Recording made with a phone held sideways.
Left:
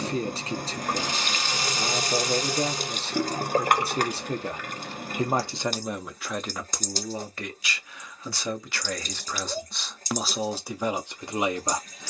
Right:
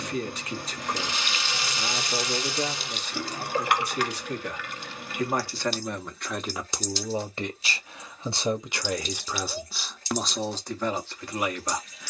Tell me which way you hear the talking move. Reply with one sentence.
You can hear the talking go right and come back.